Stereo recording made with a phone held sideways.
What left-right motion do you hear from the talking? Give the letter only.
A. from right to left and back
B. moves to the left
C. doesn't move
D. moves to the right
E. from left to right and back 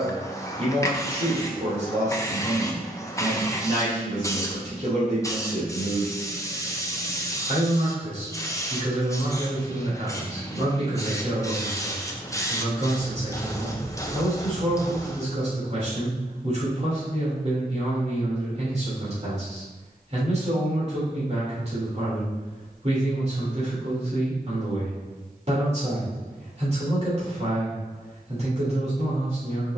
C.